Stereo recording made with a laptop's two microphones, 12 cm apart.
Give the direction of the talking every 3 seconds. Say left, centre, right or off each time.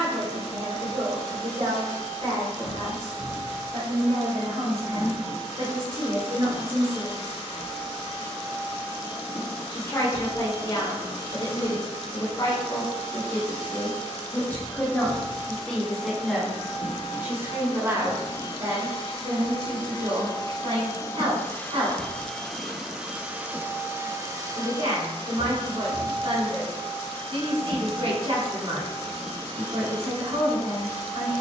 right, right, right, left, left, centre, right, right, right, right, right.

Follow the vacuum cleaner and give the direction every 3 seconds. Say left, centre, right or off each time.
left, left, left, left, left, left, left, centre, right, right, right.